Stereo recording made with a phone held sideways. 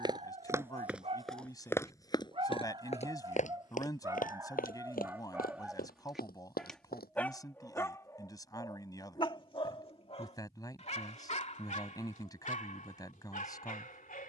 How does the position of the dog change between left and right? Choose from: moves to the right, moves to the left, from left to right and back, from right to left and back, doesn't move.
moves to the left.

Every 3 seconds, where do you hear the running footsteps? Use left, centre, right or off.
centre, left, left, off, off.